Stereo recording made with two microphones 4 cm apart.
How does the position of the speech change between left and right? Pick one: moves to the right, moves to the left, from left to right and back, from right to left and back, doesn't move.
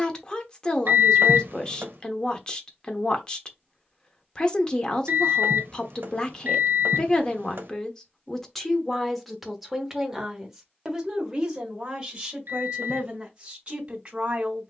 moves to the right.